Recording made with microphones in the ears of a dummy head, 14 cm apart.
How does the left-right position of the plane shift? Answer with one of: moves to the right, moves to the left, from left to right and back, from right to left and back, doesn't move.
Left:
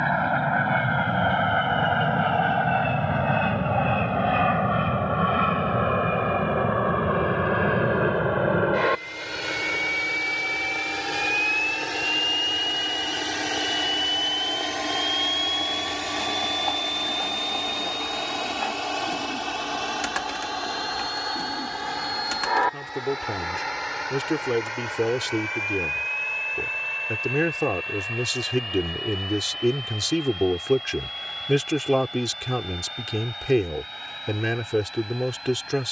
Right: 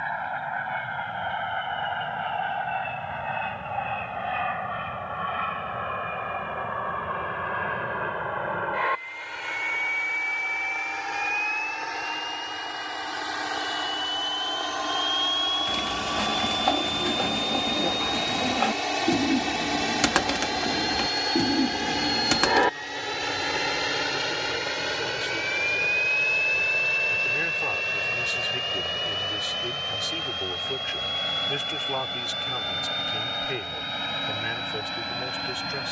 moves to the right.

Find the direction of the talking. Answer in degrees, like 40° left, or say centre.
60° left.